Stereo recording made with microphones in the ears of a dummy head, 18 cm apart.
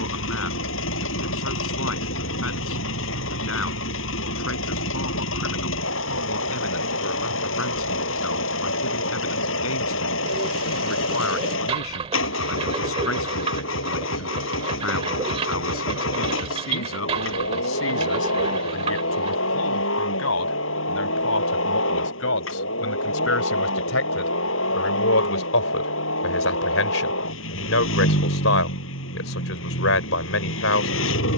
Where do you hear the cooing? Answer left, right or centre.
right.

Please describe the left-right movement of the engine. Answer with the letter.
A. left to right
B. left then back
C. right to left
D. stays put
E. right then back
D.